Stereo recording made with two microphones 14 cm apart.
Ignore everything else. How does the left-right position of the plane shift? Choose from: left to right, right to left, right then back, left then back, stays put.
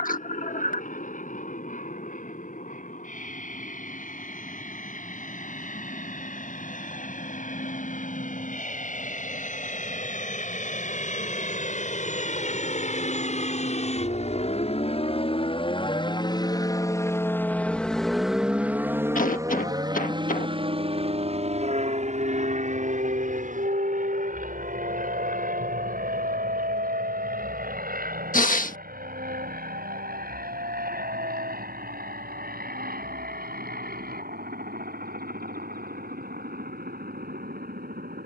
left to right.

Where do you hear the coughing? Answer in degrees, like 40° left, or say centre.
70° left.